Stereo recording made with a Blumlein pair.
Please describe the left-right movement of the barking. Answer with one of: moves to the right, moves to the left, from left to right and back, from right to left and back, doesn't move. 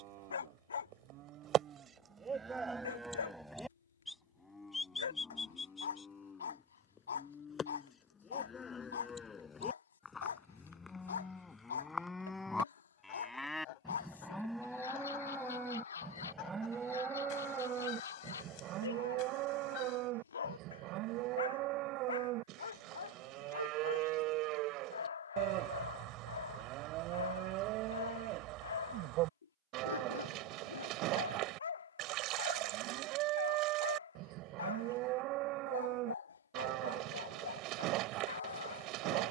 doesn't move.